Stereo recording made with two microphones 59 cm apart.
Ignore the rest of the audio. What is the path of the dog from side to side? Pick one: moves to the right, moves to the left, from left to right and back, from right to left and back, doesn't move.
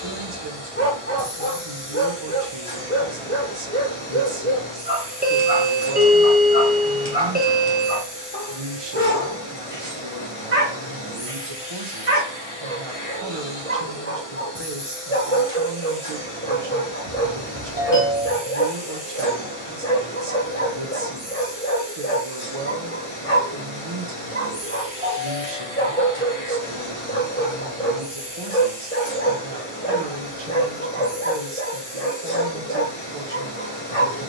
doesn't move.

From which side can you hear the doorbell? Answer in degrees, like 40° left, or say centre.
20° right.